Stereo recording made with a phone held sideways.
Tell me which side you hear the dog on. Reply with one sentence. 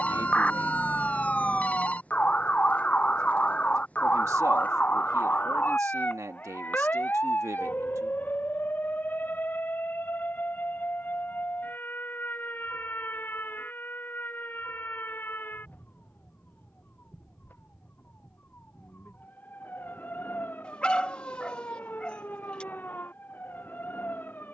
You can hear the dog in the centre.